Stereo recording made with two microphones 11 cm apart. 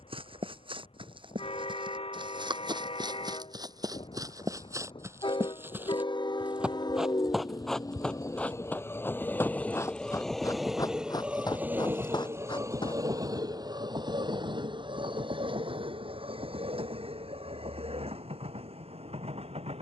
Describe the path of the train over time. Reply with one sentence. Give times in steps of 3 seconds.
You can hear the train on the left from 0 s, in the centre from 9 s and on the right from 12 s.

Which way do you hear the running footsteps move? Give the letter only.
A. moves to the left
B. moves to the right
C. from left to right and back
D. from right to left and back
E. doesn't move
A.